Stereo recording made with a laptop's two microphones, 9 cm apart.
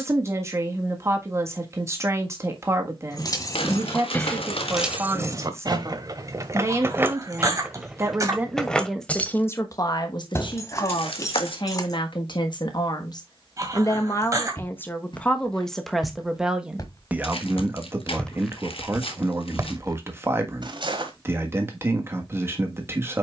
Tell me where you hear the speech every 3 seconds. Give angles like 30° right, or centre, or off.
30° right, 30° right, 20° right, 50° left, 40° left, 10° right, 30° right, 30° right.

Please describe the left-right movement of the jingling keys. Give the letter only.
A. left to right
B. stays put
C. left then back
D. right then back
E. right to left
D.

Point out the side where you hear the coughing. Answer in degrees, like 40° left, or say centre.
30° right.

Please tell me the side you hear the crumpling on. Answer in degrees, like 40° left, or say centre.
80° left.